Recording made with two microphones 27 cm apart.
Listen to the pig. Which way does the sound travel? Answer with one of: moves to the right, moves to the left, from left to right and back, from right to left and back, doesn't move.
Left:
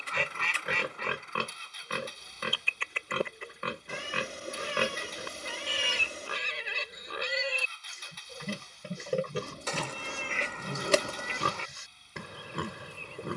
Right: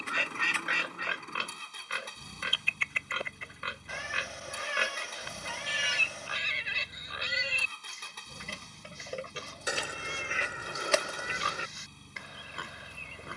doesn't move.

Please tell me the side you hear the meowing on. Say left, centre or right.
left.